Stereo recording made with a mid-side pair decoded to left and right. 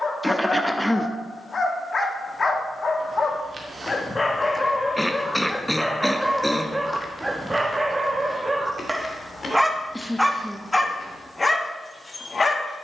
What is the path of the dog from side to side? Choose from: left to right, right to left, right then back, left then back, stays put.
right then back.